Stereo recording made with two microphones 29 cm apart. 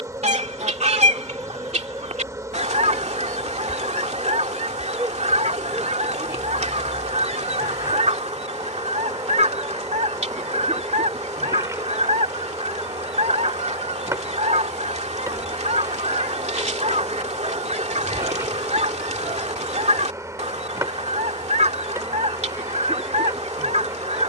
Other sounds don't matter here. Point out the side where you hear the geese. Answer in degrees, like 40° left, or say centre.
20° right.